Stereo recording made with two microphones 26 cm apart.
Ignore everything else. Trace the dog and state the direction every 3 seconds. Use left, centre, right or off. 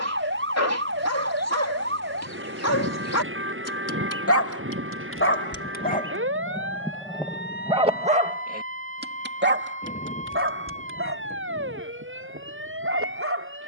left, left, centre, right, right.